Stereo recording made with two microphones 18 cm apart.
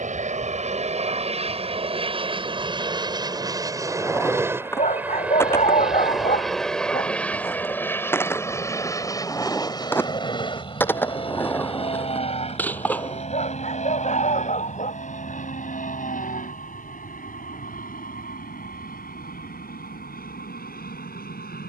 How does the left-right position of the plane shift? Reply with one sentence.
You can hear the plane move from right to left.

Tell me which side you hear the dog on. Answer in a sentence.
You can hear the dog on the left.